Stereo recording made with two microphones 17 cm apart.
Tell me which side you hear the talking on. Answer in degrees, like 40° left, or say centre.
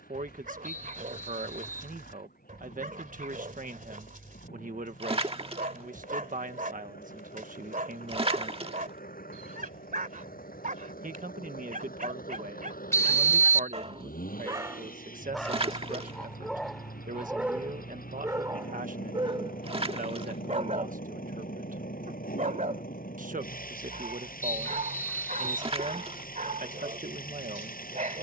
50° right.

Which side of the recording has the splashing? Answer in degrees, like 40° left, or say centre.
30° right.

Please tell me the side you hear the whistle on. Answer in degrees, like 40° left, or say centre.
20° left.